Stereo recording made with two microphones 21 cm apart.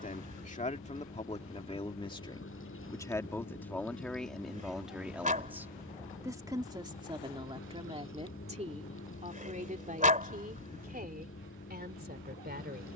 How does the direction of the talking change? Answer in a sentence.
In this clip you hear the talking go from the left side to the right.